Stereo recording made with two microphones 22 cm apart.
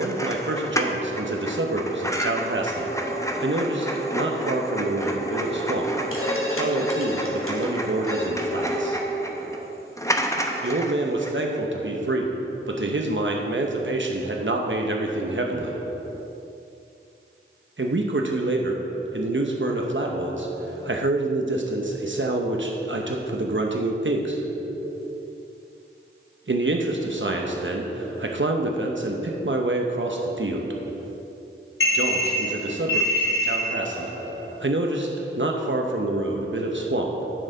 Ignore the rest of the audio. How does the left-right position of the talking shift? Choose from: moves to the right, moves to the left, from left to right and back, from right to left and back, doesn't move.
doesn't move.